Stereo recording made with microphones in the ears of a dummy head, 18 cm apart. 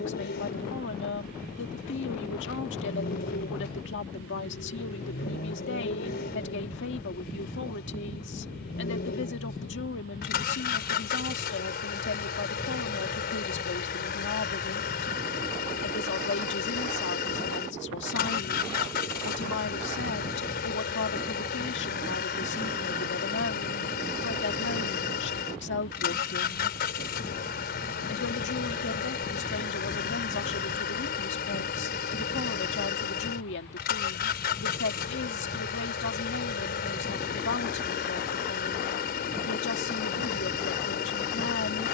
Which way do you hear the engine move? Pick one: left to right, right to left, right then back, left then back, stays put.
stays put.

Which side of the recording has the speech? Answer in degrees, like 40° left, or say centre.
60° left.